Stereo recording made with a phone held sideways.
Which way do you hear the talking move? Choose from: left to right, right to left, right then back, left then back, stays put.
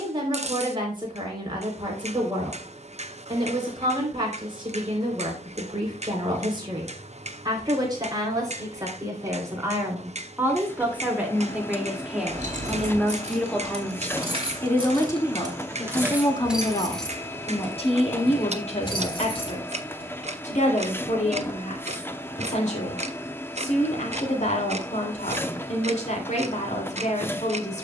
right to left.